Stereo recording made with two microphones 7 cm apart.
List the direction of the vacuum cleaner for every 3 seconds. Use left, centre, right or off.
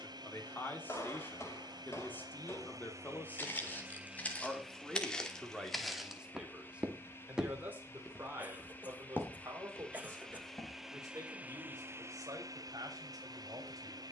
right, centre, left, centre, right.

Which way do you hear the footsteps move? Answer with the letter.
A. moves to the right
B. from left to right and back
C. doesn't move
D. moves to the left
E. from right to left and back
B.